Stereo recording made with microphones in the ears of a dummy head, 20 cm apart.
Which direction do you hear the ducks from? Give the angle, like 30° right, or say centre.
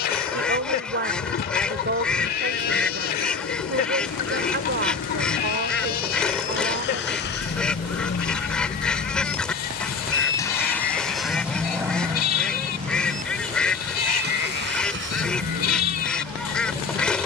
centre.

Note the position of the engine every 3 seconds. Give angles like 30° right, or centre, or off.
70° left, 60° left, 50° left, 10° left, 40° right, 60° right.